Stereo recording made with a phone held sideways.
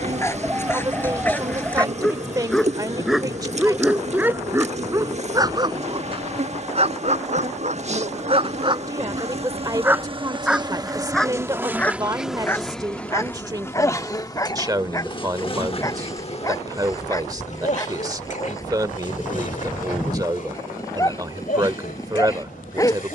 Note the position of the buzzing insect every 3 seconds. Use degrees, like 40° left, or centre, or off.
40° right, 40° right, 40° right, 30° right, 10° left, 40° left, 50° left, 60° left.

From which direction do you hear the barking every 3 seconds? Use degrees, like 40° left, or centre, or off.
10° left, 10° right, 40° right, centre, 20° left, 20° left, 20° left, 20° left.